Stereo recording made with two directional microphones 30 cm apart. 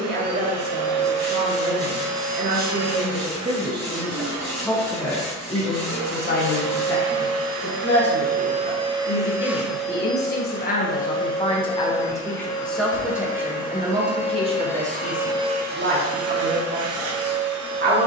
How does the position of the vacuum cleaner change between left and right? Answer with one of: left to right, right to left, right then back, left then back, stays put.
left then back.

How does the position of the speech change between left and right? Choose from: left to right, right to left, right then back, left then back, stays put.
left then back.